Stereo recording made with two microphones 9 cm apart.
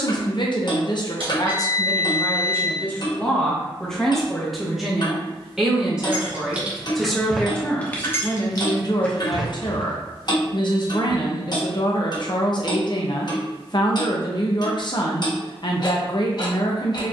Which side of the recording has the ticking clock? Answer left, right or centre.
left.